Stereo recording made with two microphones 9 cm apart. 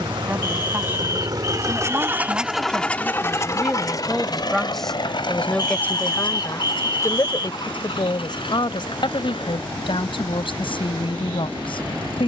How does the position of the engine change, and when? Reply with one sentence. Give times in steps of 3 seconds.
In this clip you hear the engine on the right from 0 s and on the left from 3 s.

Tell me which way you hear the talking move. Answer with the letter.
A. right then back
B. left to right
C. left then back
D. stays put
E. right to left
E.